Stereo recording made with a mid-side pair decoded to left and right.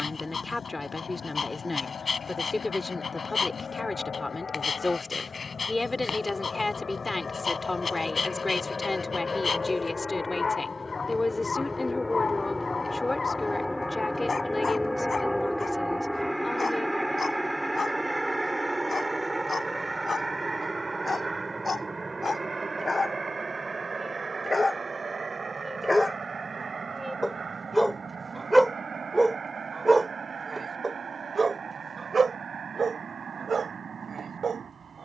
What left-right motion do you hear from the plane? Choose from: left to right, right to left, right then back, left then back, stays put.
left to right.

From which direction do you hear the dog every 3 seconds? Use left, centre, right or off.
left, left, left, left, left, left, left, left, left, centre, right, right.